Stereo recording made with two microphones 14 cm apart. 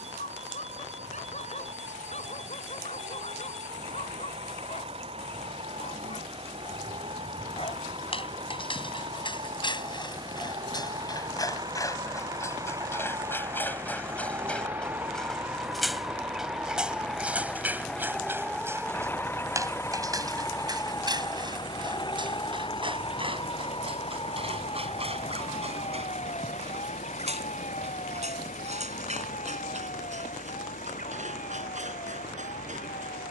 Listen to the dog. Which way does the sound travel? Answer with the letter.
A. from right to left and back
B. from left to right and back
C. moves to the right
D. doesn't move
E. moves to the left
C.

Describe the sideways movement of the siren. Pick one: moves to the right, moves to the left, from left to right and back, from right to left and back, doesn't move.
moves to the left.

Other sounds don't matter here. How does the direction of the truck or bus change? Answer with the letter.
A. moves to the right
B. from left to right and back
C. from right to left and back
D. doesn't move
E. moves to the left
E.